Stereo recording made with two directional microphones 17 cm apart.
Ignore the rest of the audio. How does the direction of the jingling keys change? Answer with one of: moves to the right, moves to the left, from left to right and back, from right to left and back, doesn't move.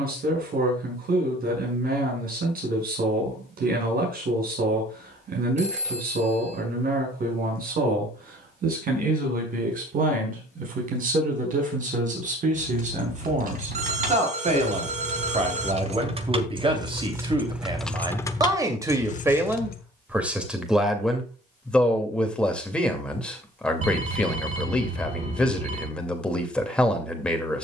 moves to the left.